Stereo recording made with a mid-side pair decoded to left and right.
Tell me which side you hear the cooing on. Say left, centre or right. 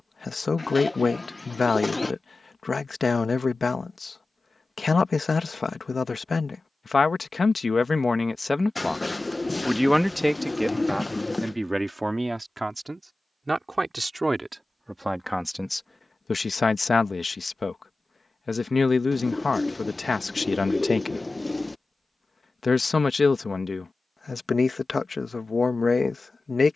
left.